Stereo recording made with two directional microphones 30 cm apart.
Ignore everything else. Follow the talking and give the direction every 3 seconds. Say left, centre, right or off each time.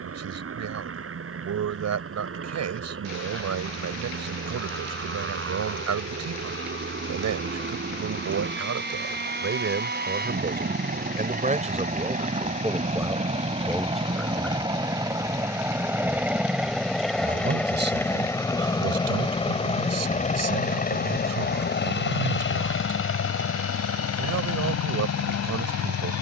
right, right, right, right, centre, right, right, right, right.